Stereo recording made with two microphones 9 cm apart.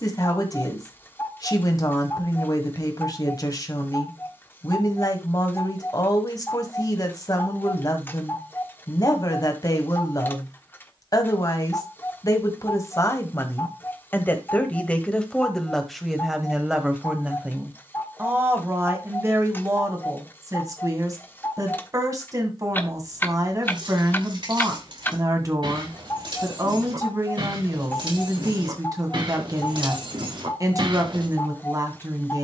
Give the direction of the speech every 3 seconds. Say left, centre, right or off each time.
left, left, left, left, left, centre, right, right, right, right, right.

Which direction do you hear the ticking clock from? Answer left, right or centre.
left.